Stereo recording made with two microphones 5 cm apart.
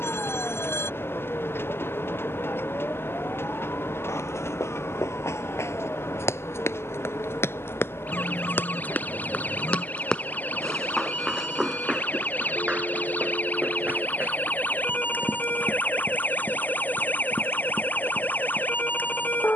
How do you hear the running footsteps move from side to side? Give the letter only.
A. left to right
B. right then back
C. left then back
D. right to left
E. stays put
A.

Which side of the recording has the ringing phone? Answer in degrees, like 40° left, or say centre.
60° left.